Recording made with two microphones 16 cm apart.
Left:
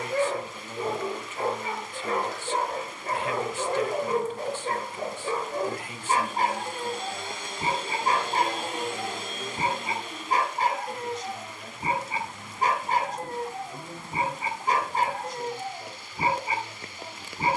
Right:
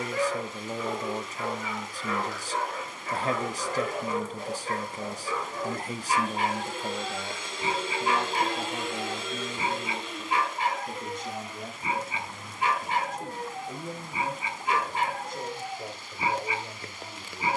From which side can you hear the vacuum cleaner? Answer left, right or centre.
left.